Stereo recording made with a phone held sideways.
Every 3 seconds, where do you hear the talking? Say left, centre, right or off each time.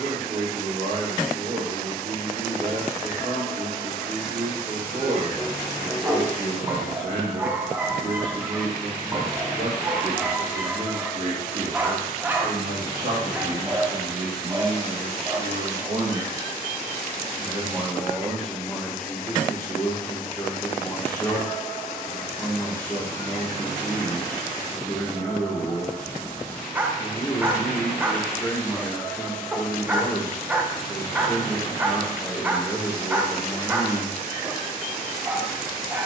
right, right, right, right, right, right, centre, centre, centre, centre, centre, centre.